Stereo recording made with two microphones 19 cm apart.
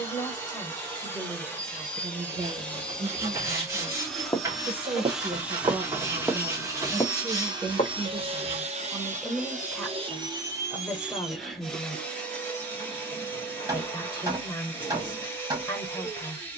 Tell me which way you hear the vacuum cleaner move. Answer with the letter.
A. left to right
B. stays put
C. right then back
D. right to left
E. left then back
C.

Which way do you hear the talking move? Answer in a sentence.
You can hear the talking move from left to right and back again.